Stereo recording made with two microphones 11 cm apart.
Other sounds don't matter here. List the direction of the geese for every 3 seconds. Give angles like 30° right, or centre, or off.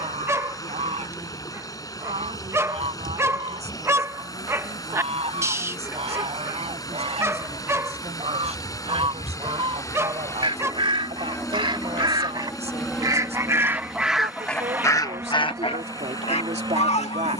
70° right, 60° right, 60° right, 50° right, 20° right, 70° left.